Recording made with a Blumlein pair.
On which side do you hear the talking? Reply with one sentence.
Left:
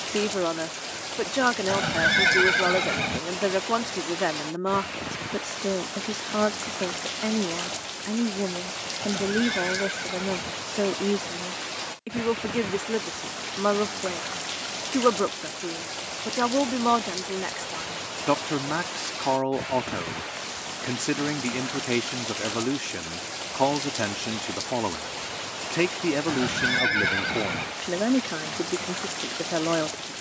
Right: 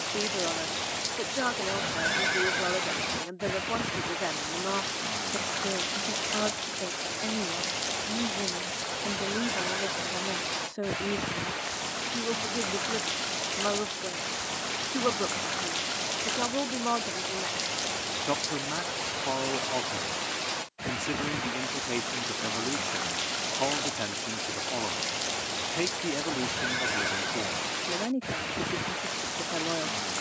You can hear the talking on the left.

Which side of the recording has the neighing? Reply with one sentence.
In this clip you hear the neighing on the left.